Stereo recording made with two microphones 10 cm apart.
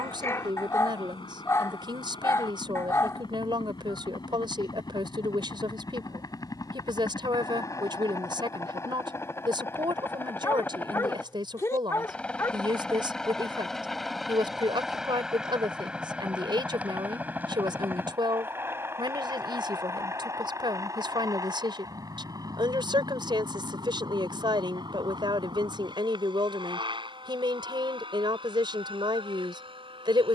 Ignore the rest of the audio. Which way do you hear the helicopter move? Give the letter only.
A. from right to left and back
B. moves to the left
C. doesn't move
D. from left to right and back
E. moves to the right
E.